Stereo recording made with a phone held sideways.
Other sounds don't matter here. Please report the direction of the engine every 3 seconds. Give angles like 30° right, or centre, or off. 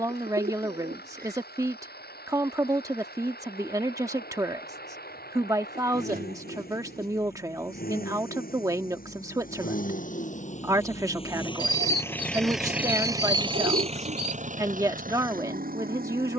80° left, 80° left, 70° left, 50° left, 30° right, 60° right.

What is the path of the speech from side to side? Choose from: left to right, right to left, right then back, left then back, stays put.
stays put.